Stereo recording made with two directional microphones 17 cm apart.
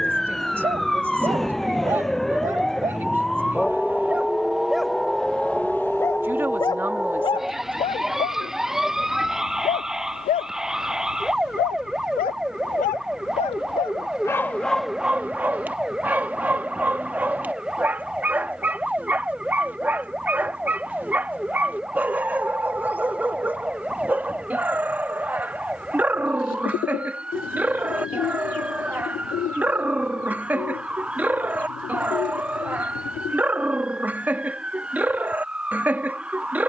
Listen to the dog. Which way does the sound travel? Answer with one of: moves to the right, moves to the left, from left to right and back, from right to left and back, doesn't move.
from right to left and back.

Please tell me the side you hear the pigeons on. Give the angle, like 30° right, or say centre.
60° left.